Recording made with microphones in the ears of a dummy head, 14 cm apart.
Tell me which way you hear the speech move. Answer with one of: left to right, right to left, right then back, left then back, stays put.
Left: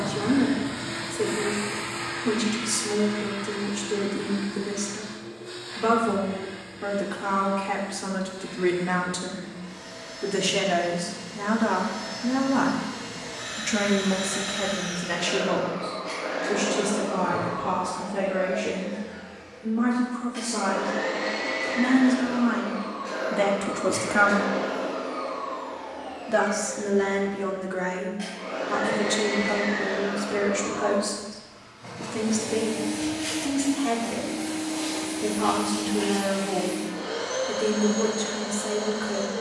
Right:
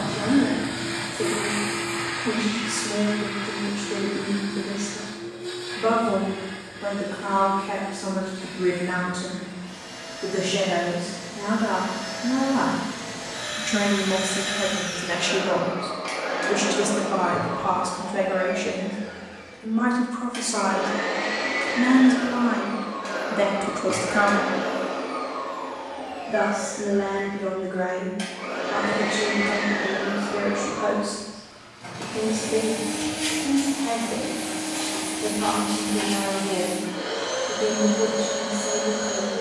right then back.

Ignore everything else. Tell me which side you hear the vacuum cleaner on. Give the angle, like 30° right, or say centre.
60° right.